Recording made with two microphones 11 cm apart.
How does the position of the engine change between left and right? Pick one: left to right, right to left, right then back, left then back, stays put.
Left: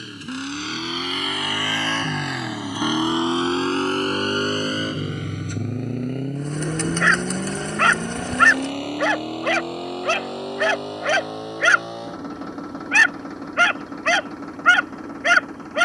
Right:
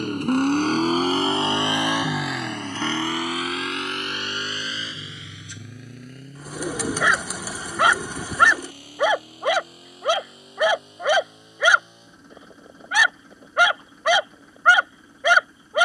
right to left.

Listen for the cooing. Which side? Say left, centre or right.
centre.